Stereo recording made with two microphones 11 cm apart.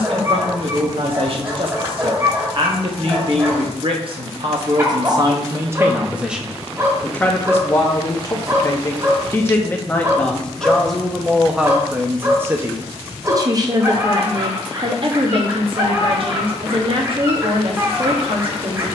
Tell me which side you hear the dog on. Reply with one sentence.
In this clip you hear the dog on the right.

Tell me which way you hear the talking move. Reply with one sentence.
In this clip you hear the talking go left and come back.